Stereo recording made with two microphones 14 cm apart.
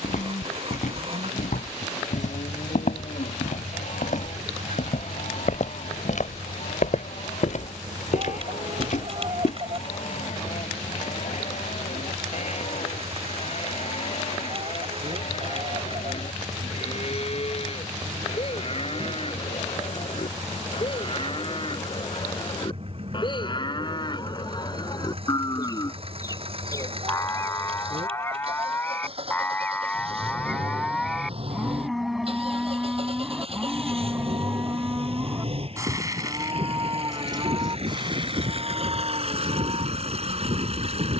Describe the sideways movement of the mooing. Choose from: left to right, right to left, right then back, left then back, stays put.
left to right.